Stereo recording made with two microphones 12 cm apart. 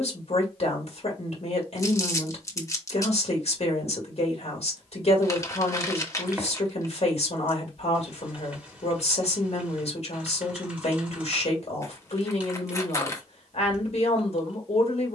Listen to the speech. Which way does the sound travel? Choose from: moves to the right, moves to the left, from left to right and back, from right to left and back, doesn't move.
doesn't move.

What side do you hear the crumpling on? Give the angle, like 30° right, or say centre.
30° left.